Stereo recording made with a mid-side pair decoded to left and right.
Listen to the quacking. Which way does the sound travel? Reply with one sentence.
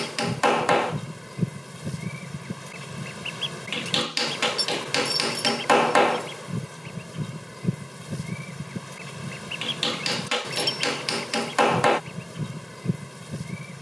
In this clip you hear the quacking stay put.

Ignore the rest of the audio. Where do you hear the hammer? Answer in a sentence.
In this clip you hear the hammer in the centre.